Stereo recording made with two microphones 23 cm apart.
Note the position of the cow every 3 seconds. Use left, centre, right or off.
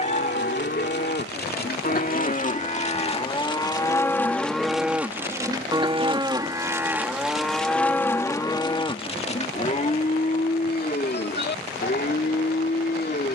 left, centre, centre, left, left.